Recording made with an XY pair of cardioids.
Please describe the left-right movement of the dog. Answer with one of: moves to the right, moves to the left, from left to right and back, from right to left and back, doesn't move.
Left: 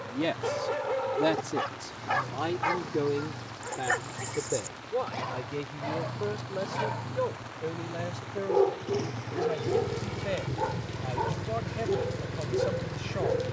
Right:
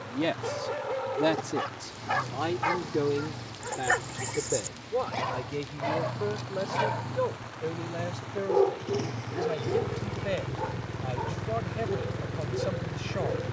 from left to right and back.